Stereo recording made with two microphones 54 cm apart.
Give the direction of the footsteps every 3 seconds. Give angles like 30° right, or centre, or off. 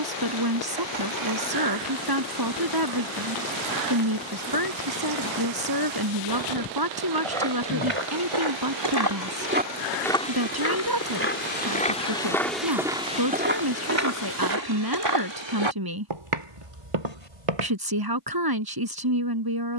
off, off, 70° right, 10° left, 20° right, 60° right, off.